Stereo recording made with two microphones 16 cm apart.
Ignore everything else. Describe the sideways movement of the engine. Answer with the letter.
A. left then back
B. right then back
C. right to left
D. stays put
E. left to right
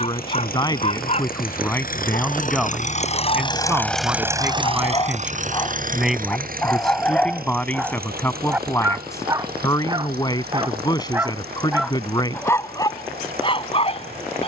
E.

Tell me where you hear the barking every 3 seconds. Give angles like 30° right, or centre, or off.
40° left, 30° left, centre, 20° right, 30° left.